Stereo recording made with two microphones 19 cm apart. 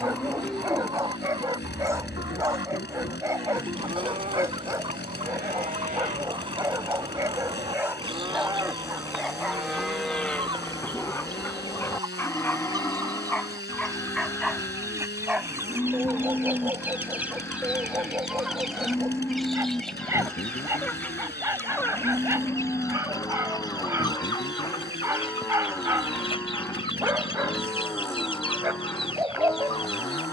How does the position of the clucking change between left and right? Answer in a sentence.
You can hear the clucking go from the right side to the left.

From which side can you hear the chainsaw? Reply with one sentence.
In this clip you hear the chainsaw on the left.